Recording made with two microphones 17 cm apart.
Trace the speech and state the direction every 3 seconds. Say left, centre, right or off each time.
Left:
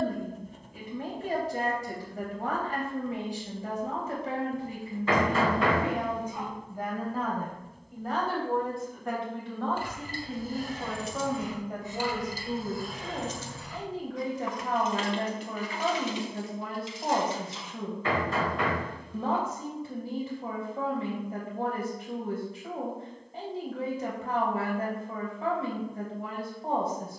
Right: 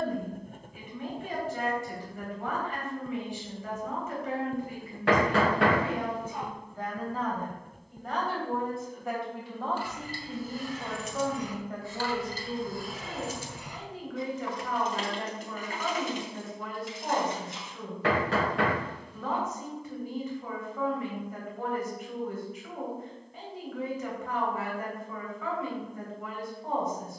left, left, centre, centre, left, left, left, left, left.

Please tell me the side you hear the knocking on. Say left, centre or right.
right.